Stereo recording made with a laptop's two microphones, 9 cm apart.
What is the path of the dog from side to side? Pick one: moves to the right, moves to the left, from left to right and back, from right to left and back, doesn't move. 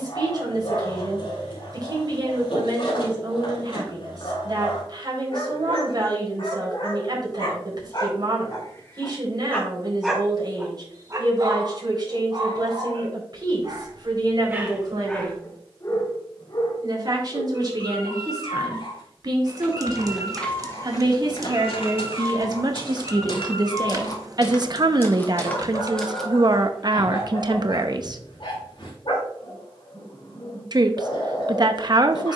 from left to right and back.